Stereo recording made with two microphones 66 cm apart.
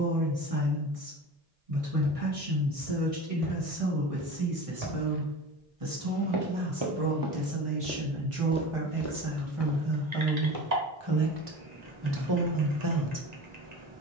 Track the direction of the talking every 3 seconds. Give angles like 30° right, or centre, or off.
50° right, 50° right, 50° right, 40° right, 30° right.